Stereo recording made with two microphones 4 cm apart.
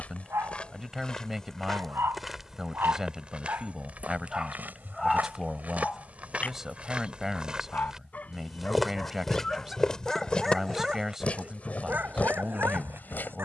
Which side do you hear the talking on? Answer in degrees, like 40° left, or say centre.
10° right.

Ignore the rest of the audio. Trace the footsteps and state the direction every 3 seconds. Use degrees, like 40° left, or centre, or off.
10° left, 40° right, 20° right, 20° left, 40° left.